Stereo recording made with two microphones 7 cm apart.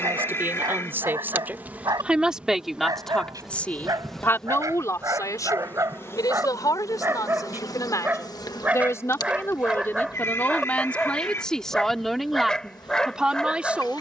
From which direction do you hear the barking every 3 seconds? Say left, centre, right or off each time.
right, right, right, centre, centre.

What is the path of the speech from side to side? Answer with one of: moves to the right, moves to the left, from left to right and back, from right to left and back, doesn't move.
from right to left and back.